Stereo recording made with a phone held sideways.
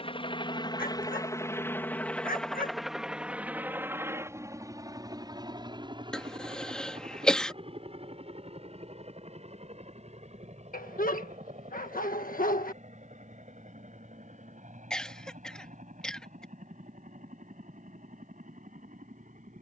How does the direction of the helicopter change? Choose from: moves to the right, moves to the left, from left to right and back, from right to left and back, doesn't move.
moves to the right.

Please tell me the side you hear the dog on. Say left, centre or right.
left.